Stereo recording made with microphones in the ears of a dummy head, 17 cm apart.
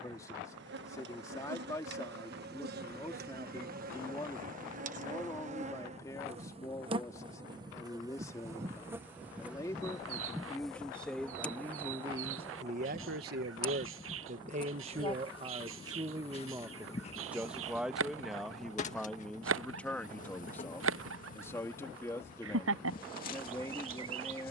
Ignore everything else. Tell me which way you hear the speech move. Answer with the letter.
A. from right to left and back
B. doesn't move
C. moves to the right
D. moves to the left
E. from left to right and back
E.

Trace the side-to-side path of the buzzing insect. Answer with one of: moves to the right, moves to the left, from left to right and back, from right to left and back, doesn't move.
moves to the left.